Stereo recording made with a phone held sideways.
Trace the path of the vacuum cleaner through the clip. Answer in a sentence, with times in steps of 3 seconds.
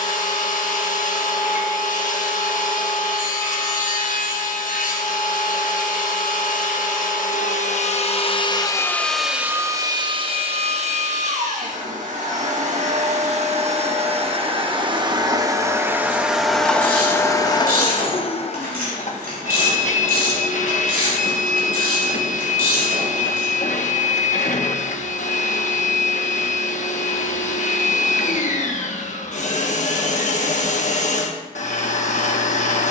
In this clip you hear the vacuum cleaner on the left from 0 s, on the right from 9 s, in the centre from 15 s and on the left from 18 s.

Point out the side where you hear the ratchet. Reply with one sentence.
You can hear the ratchet on the right.